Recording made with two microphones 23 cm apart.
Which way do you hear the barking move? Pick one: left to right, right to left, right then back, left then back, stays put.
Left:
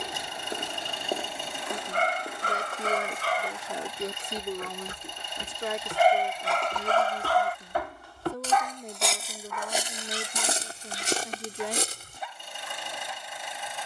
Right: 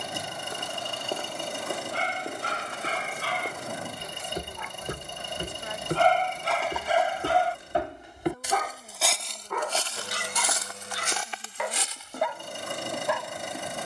left to right.